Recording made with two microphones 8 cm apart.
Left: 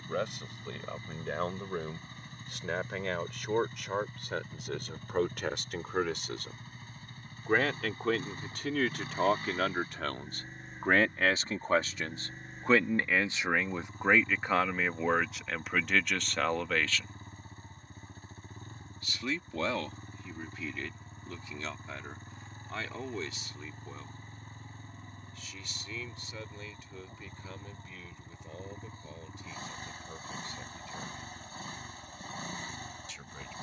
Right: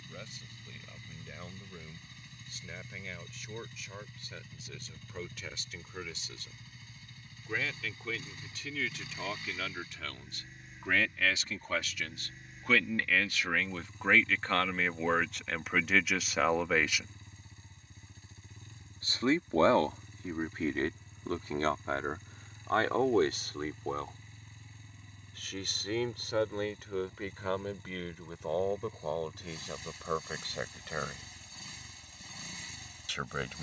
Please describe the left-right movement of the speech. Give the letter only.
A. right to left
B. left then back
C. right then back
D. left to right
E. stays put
D.